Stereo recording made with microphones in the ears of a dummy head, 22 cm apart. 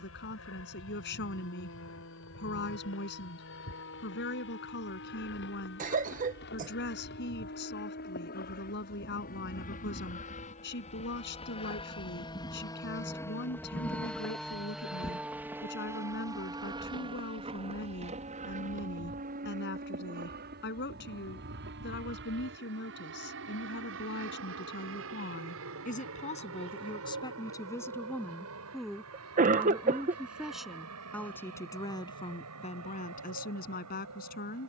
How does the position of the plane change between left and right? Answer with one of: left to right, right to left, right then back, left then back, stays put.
left to right.